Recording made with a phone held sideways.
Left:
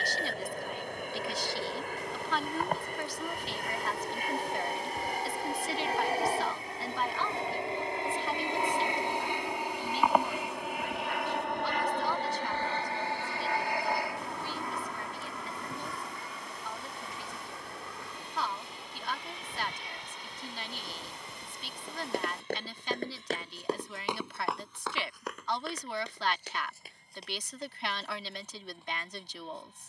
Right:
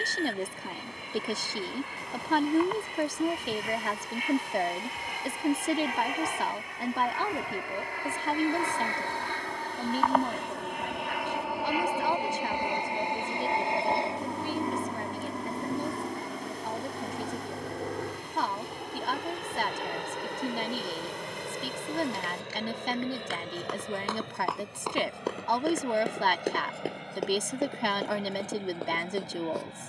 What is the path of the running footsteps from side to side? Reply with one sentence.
You can hear the running footsteps move to the right.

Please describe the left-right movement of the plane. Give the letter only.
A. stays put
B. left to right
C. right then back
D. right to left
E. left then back
B.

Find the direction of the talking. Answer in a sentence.
In this clip you hear the talking on the right.